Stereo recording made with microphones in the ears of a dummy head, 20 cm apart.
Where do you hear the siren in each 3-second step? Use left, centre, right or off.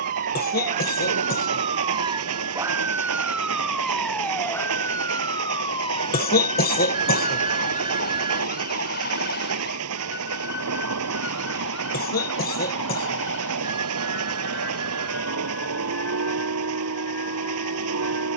right, centre, left, left, left, left.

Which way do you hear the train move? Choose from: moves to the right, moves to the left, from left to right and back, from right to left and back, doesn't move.
doesn't move.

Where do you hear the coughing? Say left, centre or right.
left.